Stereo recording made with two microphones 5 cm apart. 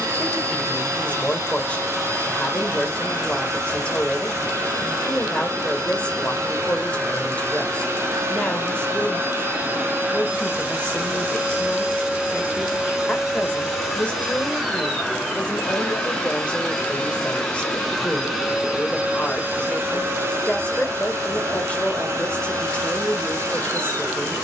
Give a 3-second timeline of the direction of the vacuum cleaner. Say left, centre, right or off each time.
right, right, right, right, centre, centre, right, right.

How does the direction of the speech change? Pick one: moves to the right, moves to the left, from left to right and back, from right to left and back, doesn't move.
doesn't move.